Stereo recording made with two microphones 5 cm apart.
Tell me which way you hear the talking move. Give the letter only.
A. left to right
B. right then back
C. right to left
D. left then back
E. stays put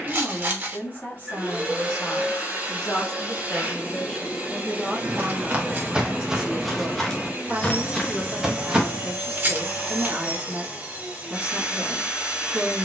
A.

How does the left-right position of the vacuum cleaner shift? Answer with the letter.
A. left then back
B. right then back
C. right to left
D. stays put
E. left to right
D.